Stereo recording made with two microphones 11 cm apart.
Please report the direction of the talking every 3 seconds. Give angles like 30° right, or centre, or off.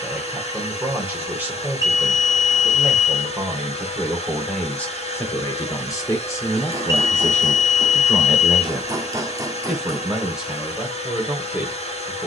20° right, 10° left, 20° left, 10° right.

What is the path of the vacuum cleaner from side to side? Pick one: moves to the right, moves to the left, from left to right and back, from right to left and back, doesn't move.
doesn't move.